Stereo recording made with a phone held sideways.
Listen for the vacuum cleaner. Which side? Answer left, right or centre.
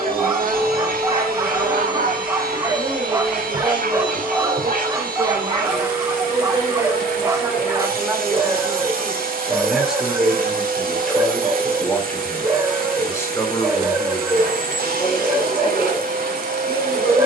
right.